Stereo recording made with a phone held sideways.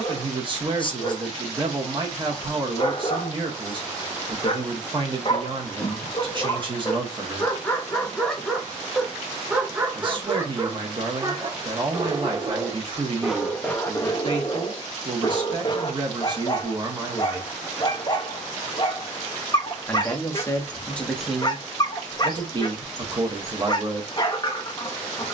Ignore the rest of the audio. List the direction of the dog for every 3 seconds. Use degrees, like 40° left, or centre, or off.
40° left, 40° left, 20° left, 20° right, centre, 30° left, 30° left, 30° left, 30° left.